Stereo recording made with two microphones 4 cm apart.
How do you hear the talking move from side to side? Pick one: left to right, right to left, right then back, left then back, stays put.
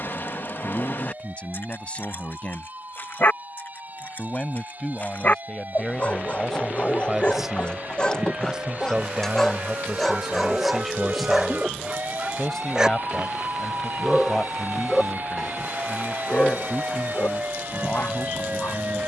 right then back.